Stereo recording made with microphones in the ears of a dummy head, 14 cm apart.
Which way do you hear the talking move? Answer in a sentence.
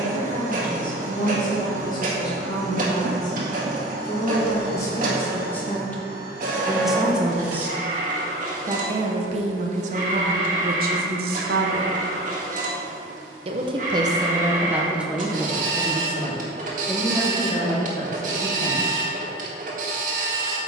You can hear the talking go right and come back.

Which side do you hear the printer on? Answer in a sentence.
In this clip you hear the printer on the right.